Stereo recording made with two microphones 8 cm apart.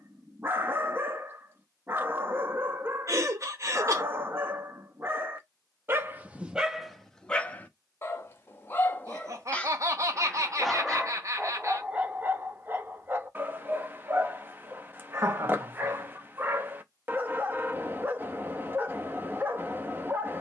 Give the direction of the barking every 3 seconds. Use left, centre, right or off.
right, right, centre, centre, right, right, right.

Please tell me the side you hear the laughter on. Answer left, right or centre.
right.